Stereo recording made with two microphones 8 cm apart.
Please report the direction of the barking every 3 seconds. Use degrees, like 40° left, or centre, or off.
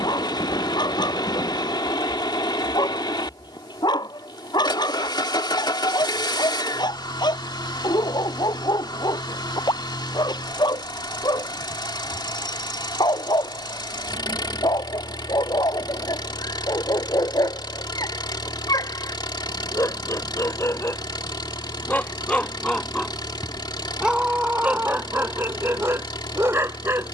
70° left, 70° left, 70° left, 70° left, 70° left, 70° left, 50° left, 10° left, 30° right.